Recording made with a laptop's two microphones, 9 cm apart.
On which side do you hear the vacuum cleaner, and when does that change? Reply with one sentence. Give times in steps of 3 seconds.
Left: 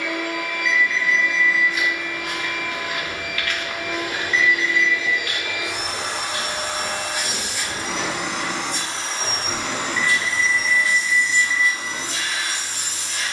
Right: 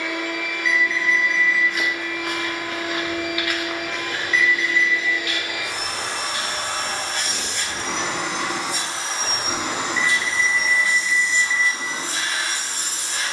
In this clip you hear the vacuum cleaner on the left from 0 s, in the centre from 6 s and on the right from 9 s.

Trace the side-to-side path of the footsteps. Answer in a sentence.
You can hear the footsteps move from right to left.